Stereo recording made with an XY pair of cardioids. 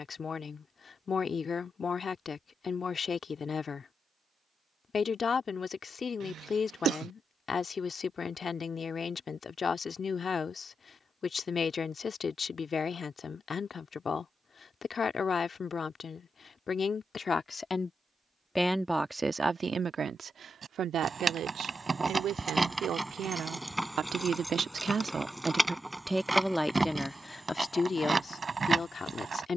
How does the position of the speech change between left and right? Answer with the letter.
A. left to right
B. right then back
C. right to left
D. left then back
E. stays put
B.